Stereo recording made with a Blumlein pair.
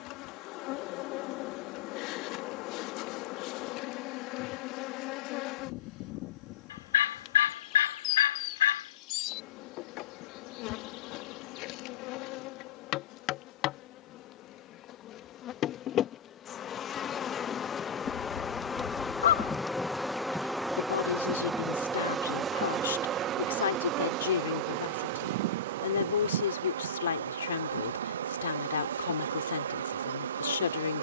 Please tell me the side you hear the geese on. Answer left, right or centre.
left.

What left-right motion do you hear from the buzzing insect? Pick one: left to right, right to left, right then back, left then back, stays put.
left to right.